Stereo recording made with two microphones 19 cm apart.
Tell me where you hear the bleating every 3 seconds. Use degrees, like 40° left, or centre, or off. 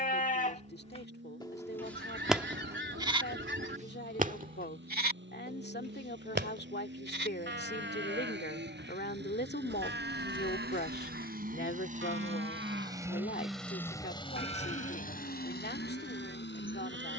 20° left, 40° right, 70° right, 70° right, 80° right, 80° right.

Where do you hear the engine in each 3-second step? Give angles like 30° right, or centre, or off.
80° right, 70° right, 70° right, 60° right, centre, 60° left.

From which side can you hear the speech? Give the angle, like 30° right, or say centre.
60° left.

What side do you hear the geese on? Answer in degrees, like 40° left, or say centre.
70° right.